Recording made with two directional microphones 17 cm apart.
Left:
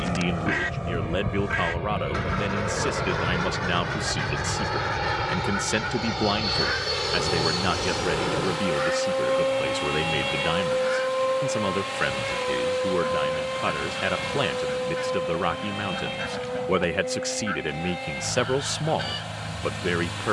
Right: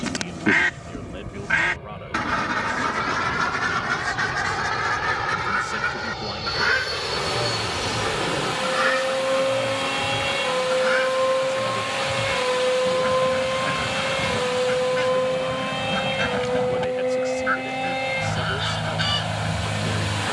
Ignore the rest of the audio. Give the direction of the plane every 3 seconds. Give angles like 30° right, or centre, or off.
50° left, 30° left, 10° left, 10° right, 30° right, 40° right, 50° right.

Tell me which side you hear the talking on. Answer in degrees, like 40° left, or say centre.
60° left.